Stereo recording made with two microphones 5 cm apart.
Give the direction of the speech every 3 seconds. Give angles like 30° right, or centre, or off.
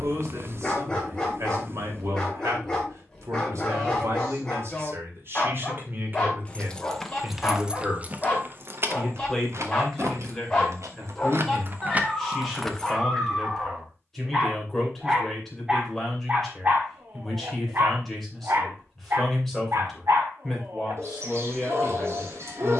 70° right, 60° right, 20° right, centre, centre, centre, centre, centre.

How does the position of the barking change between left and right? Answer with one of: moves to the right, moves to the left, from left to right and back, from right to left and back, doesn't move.
moves to the right.